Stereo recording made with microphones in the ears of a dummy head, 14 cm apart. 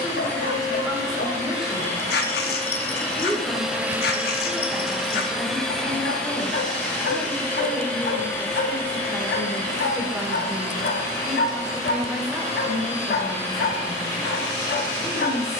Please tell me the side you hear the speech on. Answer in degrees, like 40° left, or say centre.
centre.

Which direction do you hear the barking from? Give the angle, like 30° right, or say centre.
70° left.